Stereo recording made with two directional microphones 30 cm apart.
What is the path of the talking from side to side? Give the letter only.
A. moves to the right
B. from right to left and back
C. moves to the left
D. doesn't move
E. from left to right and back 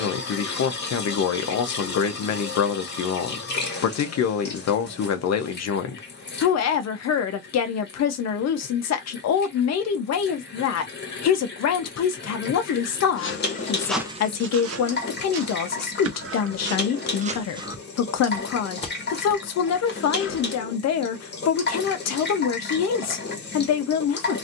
D.